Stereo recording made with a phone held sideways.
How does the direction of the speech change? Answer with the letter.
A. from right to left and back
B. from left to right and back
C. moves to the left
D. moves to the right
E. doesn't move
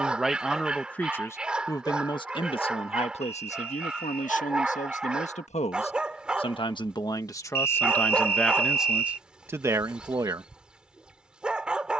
A.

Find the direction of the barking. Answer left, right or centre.
centre.